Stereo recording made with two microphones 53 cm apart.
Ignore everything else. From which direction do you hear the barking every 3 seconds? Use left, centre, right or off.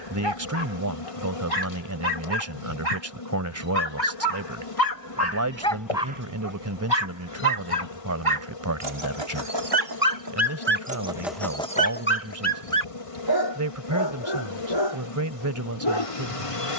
left, left, right, right, left, left.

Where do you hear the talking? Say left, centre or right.
right.